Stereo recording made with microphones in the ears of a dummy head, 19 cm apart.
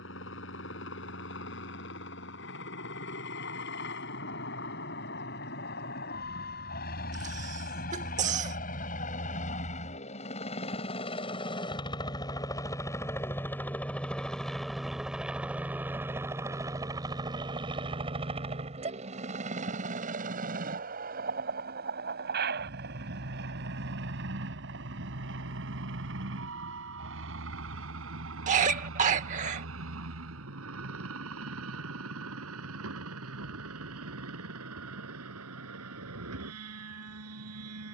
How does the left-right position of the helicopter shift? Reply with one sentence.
You can hear the helicopter go from the left side to the right.